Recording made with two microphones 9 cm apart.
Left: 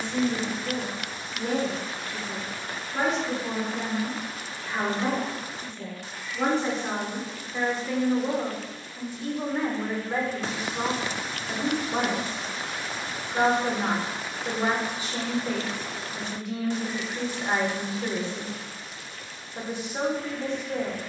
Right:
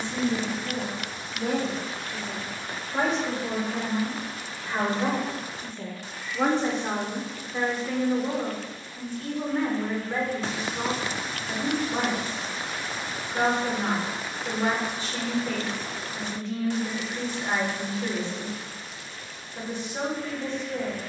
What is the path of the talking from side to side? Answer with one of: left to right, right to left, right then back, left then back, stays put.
right to left.